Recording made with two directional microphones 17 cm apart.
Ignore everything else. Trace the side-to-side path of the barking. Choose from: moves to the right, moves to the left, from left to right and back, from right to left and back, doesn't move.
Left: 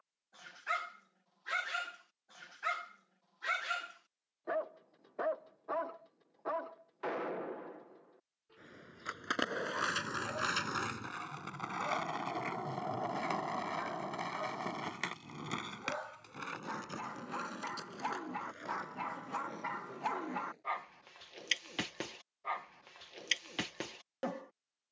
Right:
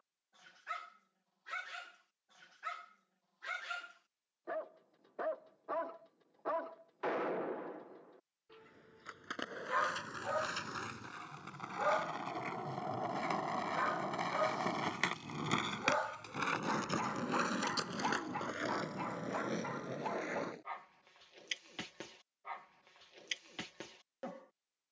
from left to right and back.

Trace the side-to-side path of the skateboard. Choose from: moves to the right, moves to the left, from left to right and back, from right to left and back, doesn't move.
moves to the right.